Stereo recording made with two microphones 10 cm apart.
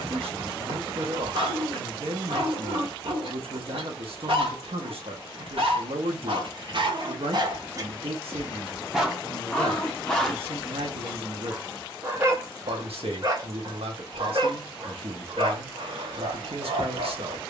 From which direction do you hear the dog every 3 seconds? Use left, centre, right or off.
right, right, right, centre, right, right.